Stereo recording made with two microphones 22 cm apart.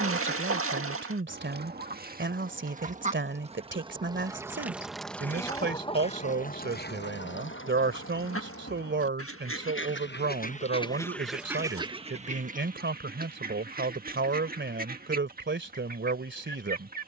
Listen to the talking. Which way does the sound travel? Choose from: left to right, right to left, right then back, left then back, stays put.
stays put.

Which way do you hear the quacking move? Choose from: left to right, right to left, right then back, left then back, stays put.
left then back.